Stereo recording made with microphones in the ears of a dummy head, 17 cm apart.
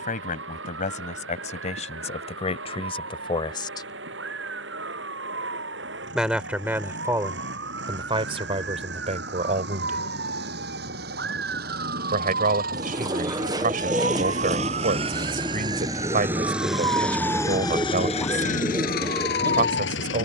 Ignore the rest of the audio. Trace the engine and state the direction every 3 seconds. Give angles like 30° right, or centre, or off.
60° right, 60° right, 60° right, 50° right, 40° right, centre, 50° left.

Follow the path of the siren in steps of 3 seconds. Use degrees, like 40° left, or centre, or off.
70° right, 60° right, 60° right, 60° right, 50° right, 20° right, 30° left.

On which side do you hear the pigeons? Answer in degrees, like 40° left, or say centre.
20° right.